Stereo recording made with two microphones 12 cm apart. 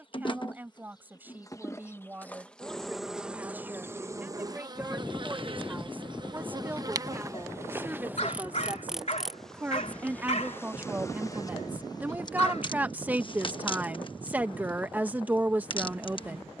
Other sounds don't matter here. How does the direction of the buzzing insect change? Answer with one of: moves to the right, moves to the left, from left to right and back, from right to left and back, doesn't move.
from left to right and back.